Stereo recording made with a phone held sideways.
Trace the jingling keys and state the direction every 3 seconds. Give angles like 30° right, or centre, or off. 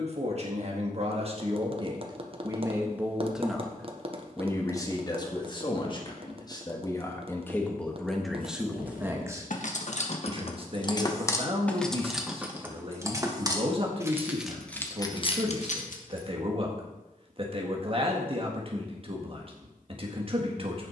off, off, 70° left, 40° left, 10° right, 50° left, off.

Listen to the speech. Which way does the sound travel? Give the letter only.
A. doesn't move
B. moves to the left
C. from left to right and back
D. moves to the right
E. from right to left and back
E.